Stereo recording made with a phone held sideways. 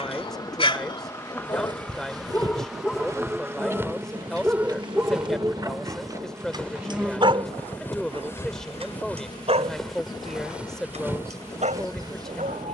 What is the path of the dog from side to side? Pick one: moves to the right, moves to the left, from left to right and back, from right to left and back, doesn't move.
moves to the right.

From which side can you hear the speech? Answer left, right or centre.
centre.